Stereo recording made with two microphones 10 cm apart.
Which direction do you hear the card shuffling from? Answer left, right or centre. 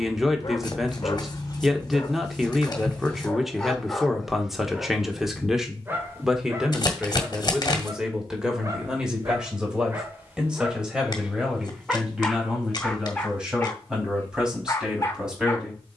left.